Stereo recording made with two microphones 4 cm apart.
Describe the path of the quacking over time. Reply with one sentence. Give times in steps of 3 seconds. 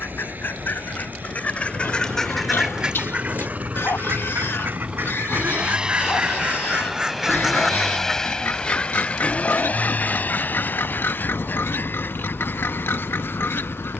You can hear the quacking on the left from 0 s, on the right from 3 s, in the centre from 6 s and on the left from 9 s.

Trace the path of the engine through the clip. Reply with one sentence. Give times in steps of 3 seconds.
In this clip you hear the engine on the right from 0 s, in the centre from 6 s and on the left from 9 s.